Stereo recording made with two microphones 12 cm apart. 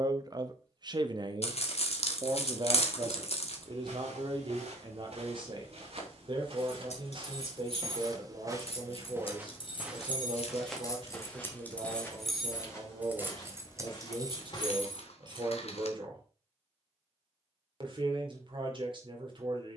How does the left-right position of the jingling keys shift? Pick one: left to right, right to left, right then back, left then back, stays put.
left to right.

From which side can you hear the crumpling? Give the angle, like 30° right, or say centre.
60° left.